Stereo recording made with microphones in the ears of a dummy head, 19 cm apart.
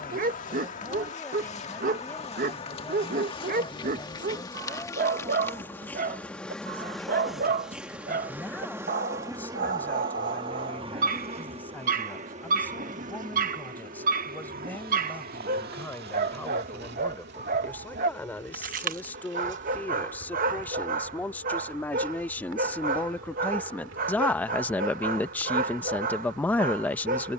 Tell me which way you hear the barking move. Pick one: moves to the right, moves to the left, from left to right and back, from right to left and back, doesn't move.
doesn't move.